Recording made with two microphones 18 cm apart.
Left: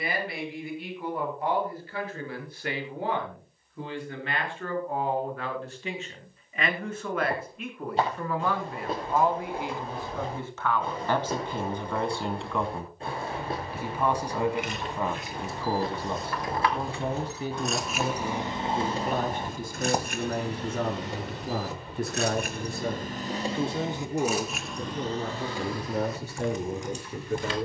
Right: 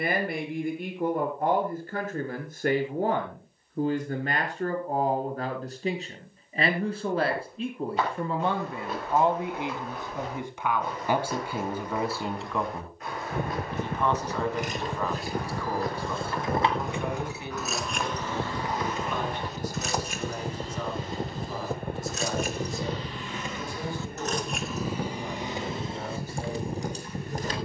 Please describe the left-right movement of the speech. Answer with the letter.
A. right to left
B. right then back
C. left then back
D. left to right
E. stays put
A.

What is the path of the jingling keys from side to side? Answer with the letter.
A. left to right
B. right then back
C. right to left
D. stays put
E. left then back
E.